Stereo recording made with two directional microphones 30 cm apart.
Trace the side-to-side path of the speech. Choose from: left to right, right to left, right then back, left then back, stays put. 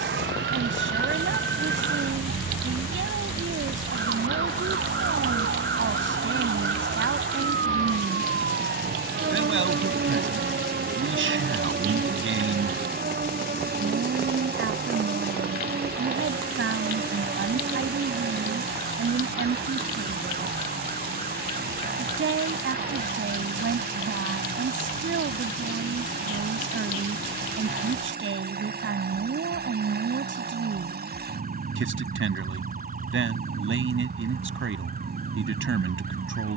stays put.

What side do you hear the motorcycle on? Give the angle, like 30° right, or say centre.
30° right.